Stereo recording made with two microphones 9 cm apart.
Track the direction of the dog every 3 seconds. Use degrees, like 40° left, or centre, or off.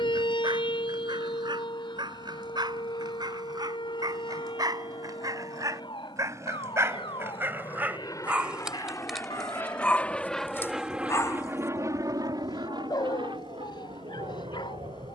60° right, 50° right, 20° right, 30° left, 60° left.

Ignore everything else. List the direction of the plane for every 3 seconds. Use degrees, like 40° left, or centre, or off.
70° left, 60° left, 50° left, centre, 60° right.